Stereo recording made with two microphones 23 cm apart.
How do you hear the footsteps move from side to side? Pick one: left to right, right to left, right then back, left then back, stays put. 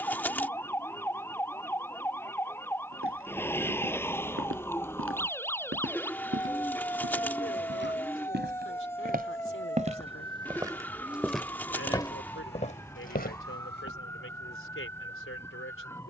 right to left.